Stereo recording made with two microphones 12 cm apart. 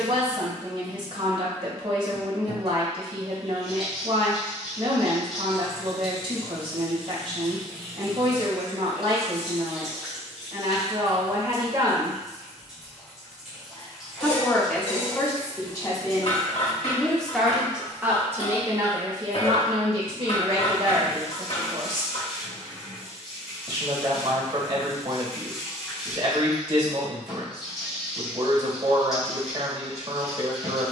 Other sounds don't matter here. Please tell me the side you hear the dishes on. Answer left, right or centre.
left.